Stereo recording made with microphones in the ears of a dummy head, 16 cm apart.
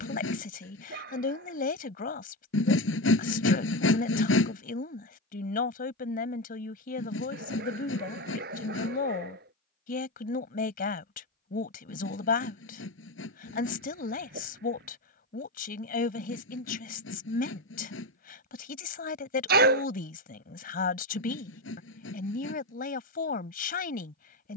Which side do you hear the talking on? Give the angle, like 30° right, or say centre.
50° left.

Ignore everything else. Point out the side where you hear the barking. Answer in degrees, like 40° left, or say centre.
60° right.